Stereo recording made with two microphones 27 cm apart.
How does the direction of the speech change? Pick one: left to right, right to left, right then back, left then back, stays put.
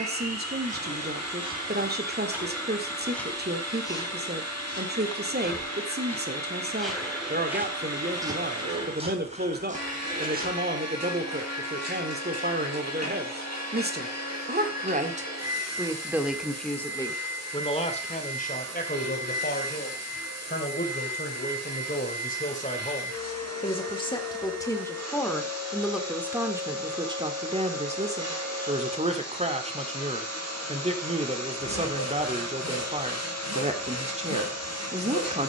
left then back.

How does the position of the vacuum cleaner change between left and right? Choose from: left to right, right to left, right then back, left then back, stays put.
stays put.